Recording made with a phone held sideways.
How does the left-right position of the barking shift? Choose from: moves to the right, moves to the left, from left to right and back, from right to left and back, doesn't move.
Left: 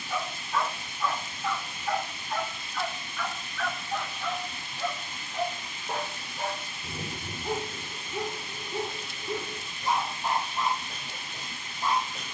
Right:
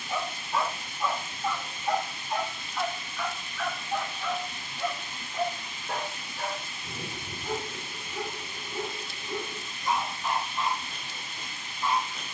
moves to the left.